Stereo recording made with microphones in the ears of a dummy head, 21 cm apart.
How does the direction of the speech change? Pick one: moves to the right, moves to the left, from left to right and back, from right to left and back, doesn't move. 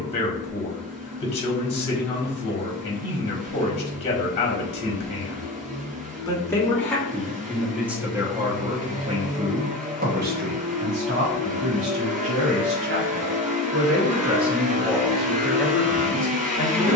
from left to right and back.